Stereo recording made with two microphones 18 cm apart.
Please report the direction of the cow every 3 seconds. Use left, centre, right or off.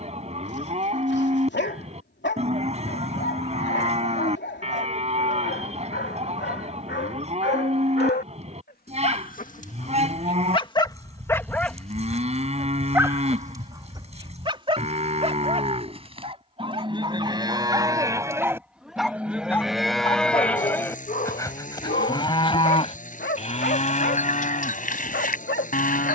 right, right, right, right, right, right, centre, left, left.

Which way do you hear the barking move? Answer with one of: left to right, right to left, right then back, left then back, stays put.
right then back.